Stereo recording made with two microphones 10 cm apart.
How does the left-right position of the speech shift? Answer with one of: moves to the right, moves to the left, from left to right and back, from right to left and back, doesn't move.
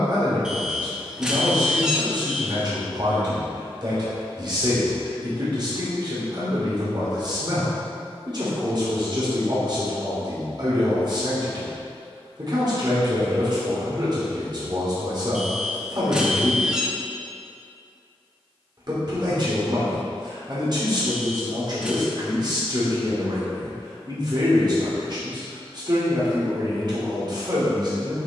doesn't move.